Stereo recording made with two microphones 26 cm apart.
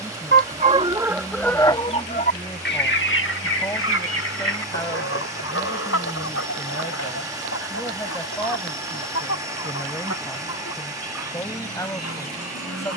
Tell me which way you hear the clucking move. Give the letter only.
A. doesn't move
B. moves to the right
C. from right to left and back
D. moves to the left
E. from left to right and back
D.